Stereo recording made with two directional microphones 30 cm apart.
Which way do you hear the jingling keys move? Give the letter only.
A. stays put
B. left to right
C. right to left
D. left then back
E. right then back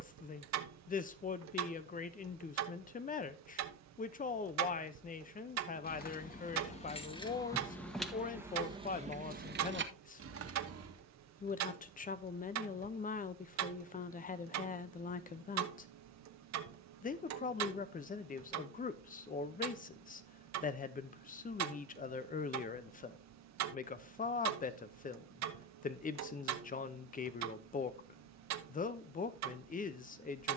B.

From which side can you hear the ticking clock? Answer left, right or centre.
right.